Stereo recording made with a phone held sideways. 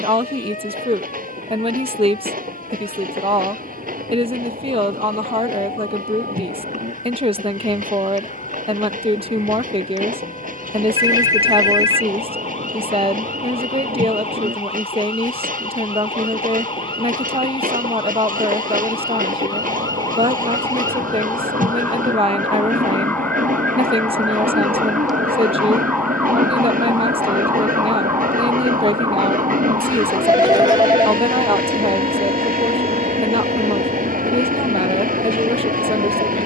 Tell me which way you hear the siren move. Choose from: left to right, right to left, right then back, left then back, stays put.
left to right.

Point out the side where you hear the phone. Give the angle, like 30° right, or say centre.
30° right.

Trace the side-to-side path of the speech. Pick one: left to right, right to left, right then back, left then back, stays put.
stays put.